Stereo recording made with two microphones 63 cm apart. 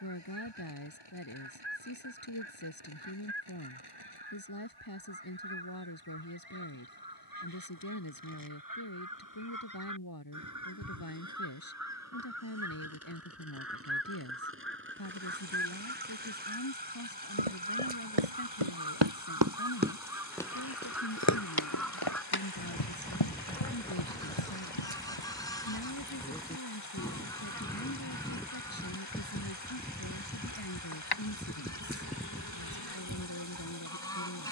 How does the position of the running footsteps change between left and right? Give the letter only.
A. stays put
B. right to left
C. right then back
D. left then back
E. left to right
B.